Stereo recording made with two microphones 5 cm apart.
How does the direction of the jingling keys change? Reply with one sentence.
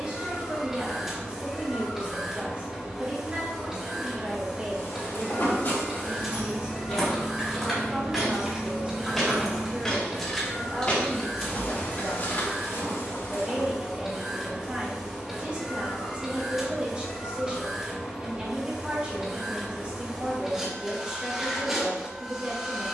In this clip you hear the jingling keys move from right to left.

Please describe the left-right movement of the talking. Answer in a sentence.
In this clip you hear the talking stay put.